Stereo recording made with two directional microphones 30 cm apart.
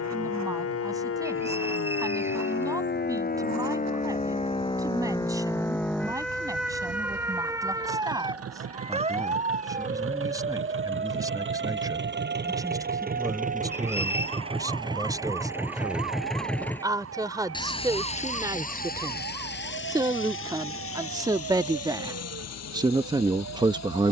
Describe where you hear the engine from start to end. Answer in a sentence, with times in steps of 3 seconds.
You can hear the engine on the right from 0 s, in the centre from 15 s and on the left from 18 s.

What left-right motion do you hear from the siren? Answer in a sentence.
You can hear the siren move from left to right.